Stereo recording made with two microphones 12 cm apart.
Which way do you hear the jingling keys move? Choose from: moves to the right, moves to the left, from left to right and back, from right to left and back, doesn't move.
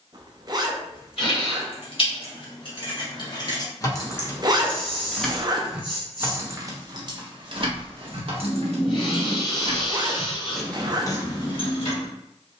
from left to right and back.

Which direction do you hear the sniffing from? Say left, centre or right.
left.